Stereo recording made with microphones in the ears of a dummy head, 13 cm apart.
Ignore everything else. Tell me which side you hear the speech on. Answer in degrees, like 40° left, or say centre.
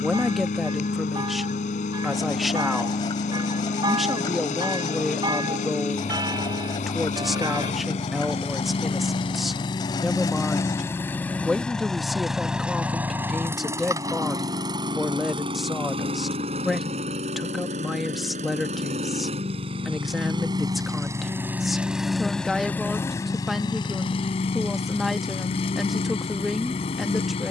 centre.